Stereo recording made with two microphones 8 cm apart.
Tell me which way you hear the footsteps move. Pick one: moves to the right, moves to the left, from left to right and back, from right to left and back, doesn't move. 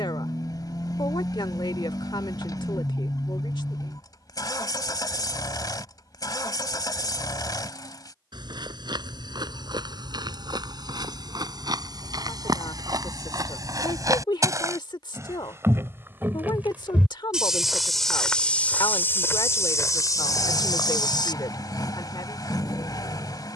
moves to the left.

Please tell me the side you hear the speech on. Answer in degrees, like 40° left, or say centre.
60° left.